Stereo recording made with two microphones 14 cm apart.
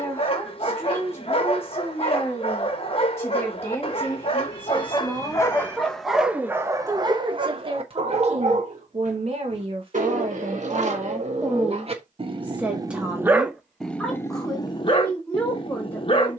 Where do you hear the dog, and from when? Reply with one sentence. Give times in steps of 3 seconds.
In this clip you hear the dog on the left from 0 s, on the right from 6 s, in the centre from 12 s and on the left from 15 s.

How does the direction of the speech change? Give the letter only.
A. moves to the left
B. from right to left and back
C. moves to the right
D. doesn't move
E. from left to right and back
E.